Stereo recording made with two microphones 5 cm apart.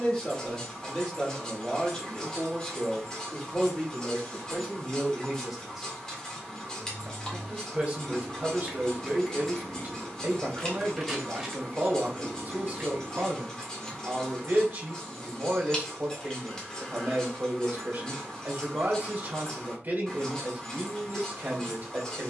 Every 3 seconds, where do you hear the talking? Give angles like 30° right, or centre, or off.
20° left, centre, 30° right, 40° right, 40° right, 40° right, 40° right, 40° right.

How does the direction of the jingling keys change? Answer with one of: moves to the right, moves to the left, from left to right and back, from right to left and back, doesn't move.
from right to left and back.